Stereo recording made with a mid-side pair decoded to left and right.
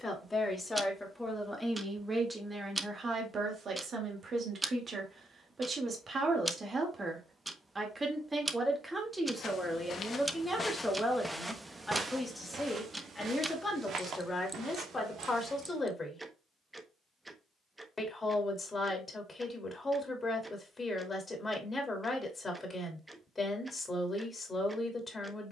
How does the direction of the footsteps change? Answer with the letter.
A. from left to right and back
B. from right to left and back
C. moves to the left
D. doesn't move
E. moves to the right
E.